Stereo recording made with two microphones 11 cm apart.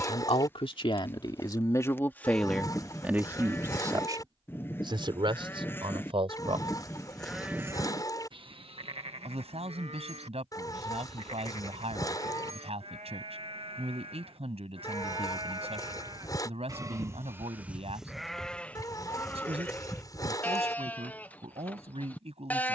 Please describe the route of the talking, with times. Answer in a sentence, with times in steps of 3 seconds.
In this clip you hear the talking on the left from 0 s and on the right from 3 s.